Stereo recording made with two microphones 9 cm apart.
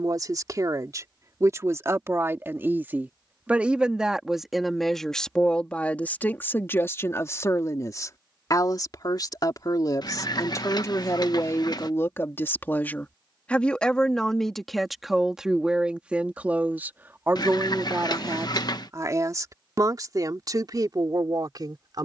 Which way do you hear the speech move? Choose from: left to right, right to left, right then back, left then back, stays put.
left then back.